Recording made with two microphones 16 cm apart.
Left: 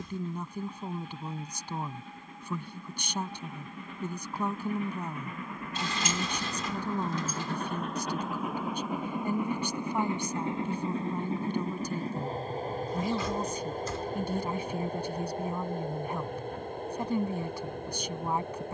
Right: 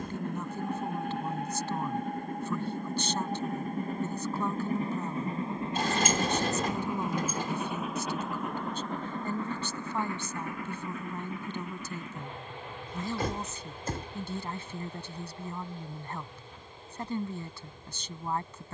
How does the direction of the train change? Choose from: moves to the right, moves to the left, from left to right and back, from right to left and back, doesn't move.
moves to the left.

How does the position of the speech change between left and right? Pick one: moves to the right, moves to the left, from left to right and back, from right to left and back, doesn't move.
doesn't move.